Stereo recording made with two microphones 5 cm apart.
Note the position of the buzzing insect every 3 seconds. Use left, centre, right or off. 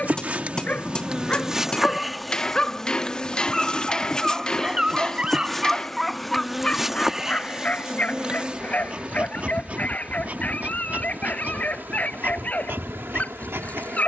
centre, centre, centre, right, right.